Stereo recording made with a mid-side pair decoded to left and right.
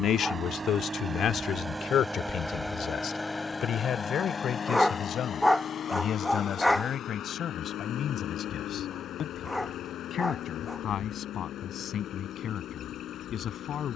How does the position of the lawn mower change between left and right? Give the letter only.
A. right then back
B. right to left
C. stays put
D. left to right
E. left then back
B.